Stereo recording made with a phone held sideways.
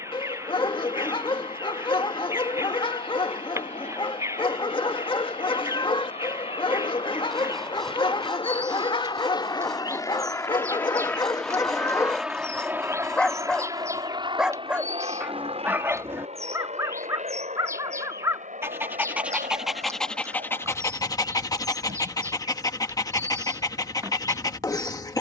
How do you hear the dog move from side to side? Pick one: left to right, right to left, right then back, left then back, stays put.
right then back.